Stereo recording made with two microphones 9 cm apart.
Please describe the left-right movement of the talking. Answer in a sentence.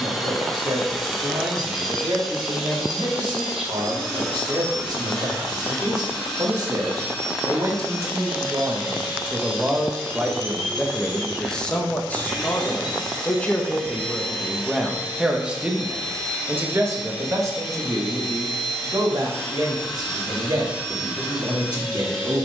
You can hear the talking move from right to left and back again.